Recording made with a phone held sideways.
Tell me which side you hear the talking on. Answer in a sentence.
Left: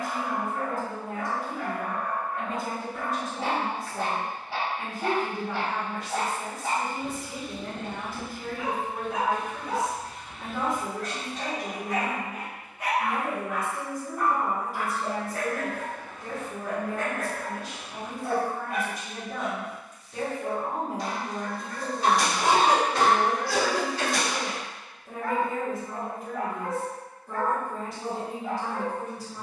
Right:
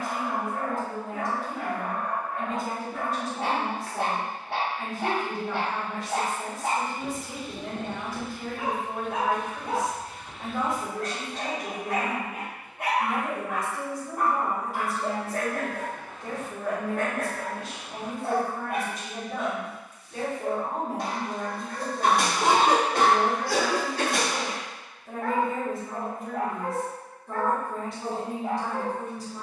You can hear the talking in the centre.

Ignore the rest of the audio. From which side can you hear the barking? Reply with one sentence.
You can hear the barking on the right.